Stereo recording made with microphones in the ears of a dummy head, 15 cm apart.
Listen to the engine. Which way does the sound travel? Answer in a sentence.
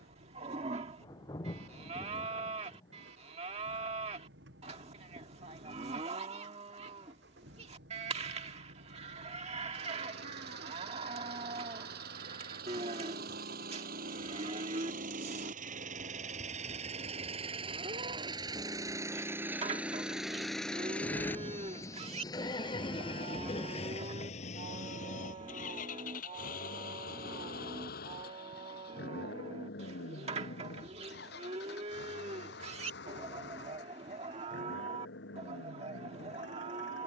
In this clip you hear the engine go from the right side to the left.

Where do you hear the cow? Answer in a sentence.
In this clip you hear the cow on the right.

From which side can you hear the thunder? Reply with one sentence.
In this clip you hear the thunder on the left.